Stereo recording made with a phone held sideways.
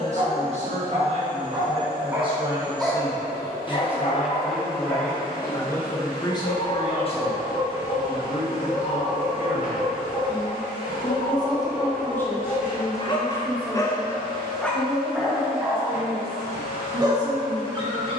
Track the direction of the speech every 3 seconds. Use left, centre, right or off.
right, centre, left, left, centre, right.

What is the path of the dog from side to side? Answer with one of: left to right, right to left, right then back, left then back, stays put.
left then back.